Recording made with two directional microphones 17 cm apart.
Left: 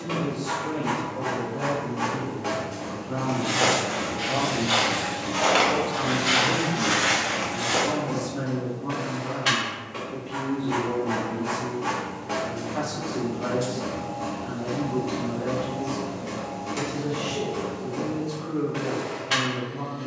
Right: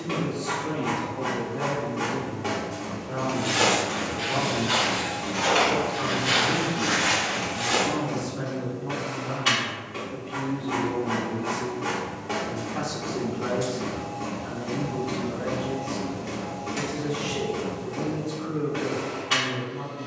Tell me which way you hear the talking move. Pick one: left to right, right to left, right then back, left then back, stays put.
left then back.